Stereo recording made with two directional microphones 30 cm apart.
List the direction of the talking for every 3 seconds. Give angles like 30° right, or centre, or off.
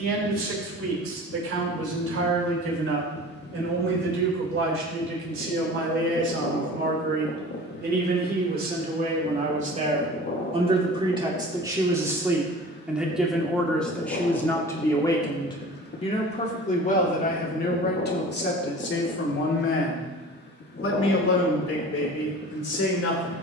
50° right, 40° right, 30° right, 20° right, centre, 20° left, 40° left, 50° left.